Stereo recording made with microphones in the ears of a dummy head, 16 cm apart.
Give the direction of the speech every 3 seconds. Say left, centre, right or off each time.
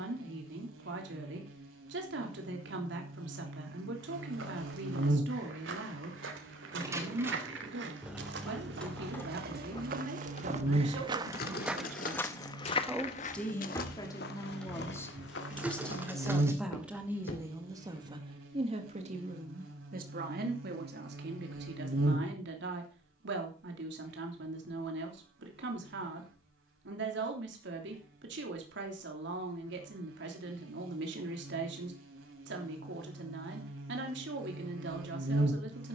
right, right, right, right, centre, centre, right, right, right, right, right, right.